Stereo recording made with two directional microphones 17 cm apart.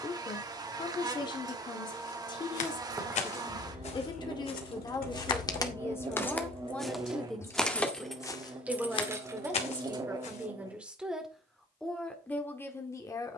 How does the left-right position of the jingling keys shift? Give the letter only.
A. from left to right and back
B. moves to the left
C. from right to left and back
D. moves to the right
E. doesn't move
C.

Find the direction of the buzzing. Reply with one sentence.
You can hear the buzzing on the right.